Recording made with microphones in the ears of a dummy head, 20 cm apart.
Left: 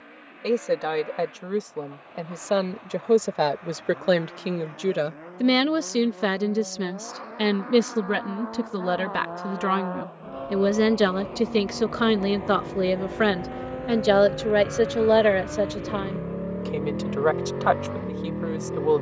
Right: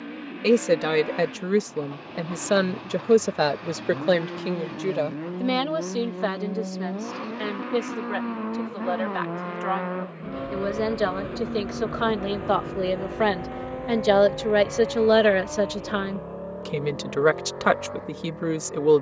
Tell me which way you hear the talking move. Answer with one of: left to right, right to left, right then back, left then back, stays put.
left then back.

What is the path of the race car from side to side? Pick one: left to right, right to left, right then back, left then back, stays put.
right to left.